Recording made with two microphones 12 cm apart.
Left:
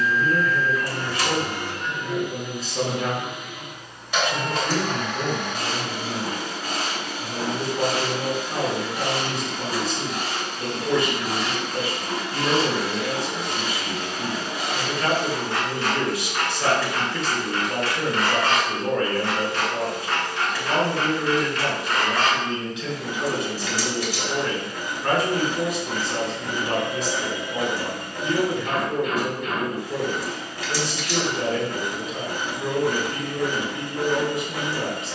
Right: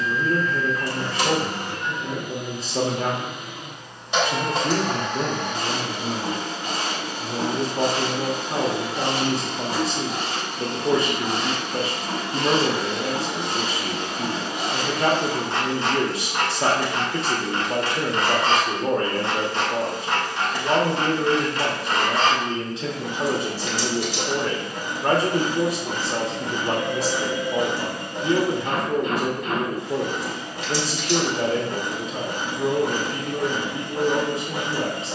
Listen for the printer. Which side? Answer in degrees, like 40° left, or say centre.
20° right.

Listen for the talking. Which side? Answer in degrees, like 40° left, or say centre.
30° right.